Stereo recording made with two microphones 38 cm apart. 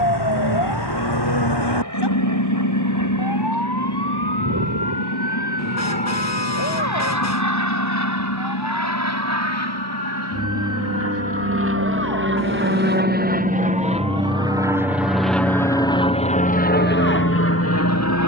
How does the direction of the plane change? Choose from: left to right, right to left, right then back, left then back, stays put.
right to left.